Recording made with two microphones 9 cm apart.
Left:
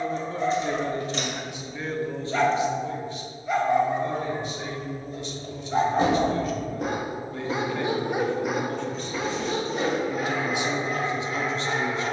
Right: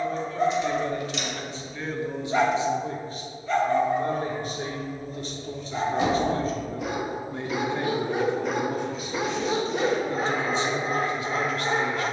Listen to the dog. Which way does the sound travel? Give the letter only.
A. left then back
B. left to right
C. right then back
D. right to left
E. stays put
A.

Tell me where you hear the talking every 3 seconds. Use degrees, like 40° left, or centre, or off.
10° left, 40° right, 20° right, 10° left.